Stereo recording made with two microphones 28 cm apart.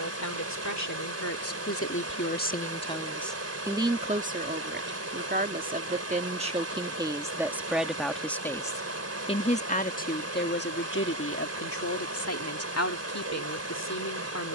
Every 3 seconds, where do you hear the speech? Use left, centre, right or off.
left, right, centre, left, left.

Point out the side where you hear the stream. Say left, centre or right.
right.